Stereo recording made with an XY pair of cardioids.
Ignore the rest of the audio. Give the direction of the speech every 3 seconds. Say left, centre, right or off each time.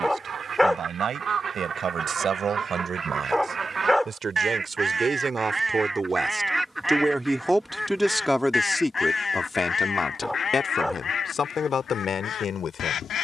right, right, centre, left, left.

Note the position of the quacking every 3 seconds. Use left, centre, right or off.
right, right, centre, left, left.